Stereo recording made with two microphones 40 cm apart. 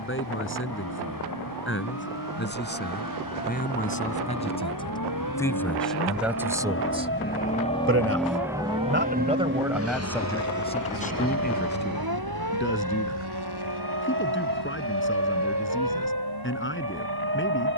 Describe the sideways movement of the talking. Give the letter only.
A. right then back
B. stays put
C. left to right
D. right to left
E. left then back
A.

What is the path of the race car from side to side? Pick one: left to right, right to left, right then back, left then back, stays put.
left to right.